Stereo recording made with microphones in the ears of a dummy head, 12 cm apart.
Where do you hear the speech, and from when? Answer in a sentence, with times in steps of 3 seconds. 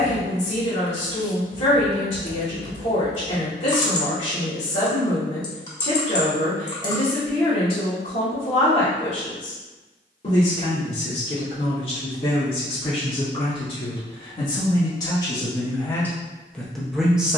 In this clip you hear the speech on the left from 0 s and in the centre from 15 s.